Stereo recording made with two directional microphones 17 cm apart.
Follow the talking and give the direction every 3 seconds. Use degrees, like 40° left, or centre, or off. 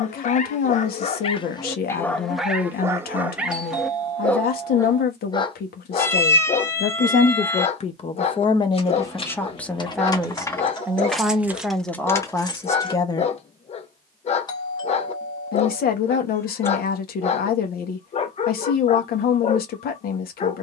60° left, 60° left, 40° left, centre, 20° left, 60° left, 60° left.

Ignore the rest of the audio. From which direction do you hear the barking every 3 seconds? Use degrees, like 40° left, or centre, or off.
20° left, 10° left, 40° left, 40° left, 40° left, 40° left, 40° left.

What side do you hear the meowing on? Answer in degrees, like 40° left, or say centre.
10° left.